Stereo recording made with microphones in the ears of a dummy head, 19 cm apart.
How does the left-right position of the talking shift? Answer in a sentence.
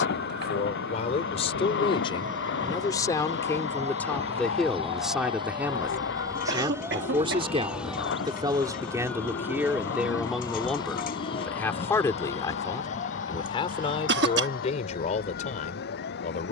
You can hear the talking move from left to right and back again.